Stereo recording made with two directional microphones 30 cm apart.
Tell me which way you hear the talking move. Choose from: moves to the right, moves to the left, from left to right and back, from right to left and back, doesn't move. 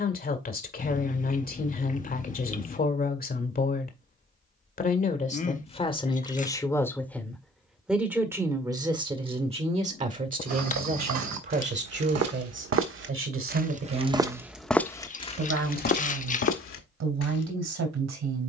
moves to the right.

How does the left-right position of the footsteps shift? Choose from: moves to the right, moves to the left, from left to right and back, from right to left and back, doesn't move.
moves to the left.